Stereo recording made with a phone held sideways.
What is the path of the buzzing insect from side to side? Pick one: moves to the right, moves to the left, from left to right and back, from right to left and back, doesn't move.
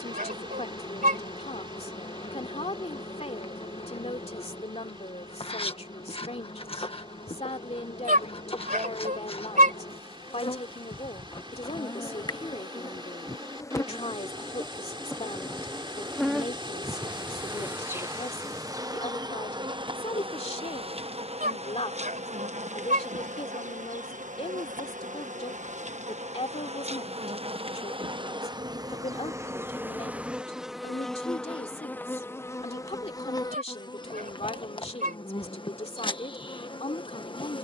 from left to right and back.